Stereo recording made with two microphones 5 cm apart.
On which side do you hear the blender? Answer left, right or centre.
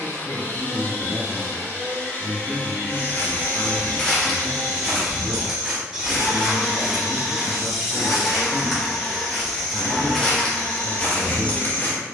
left.